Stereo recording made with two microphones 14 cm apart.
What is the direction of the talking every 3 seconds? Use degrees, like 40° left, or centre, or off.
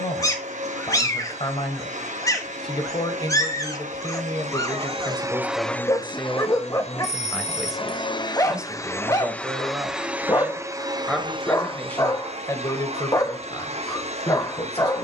40° left, 20° left, centre, centre, 30° left.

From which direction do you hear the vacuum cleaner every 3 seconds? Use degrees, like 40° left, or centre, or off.
60° right, 40° right, 40° left, 20° right, 50° right.